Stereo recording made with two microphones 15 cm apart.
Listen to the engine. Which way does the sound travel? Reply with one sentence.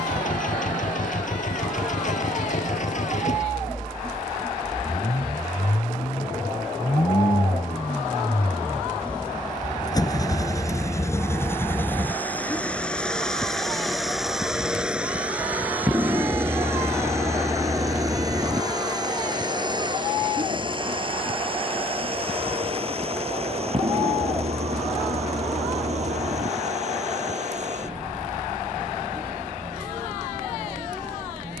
You can hear the engine go from the left side to the right.